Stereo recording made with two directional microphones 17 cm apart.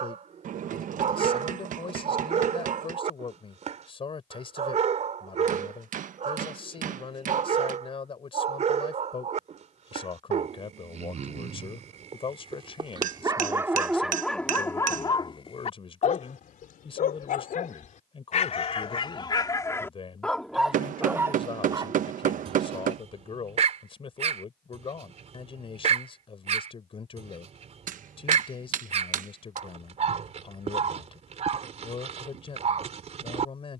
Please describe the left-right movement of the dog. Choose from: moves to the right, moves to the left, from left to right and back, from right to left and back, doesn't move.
from right to left and back.